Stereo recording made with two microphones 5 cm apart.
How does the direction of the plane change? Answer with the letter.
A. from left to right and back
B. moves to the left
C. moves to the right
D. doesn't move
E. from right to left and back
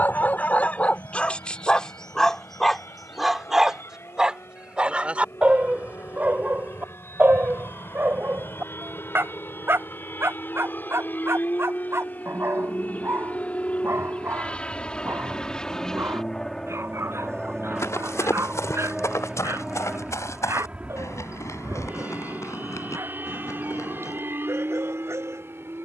C.